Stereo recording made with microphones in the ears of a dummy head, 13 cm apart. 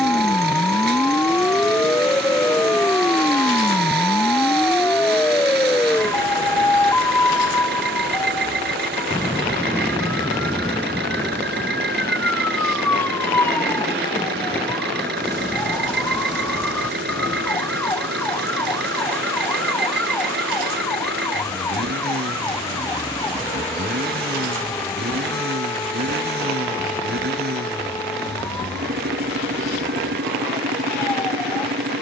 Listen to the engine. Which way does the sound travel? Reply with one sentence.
In this clip you hear the engine stay put.